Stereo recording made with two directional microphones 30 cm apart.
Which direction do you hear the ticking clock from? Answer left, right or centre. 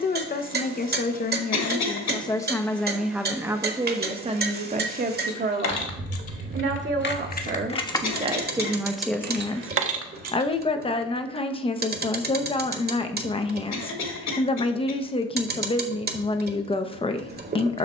right.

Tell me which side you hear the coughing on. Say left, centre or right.
left.